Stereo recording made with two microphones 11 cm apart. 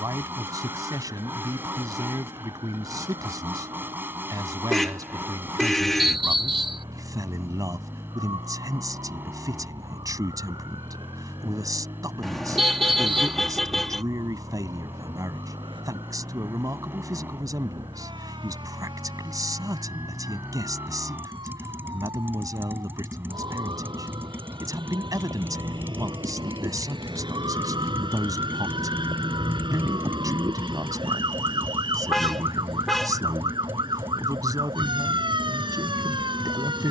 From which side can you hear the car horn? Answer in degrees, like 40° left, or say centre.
centre.